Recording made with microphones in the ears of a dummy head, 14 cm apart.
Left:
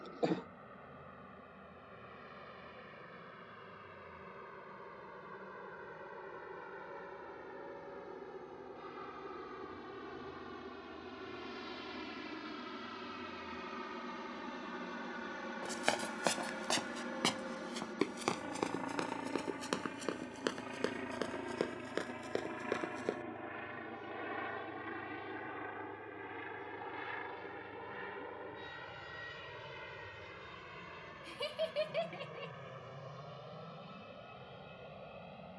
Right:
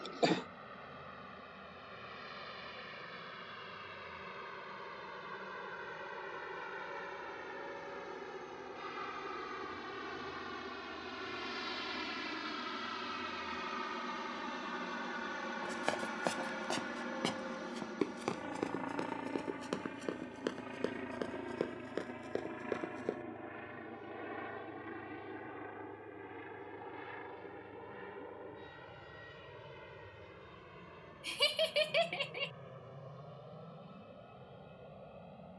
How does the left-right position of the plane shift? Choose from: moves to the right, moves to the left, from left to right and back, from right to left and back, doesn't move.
moves to the left.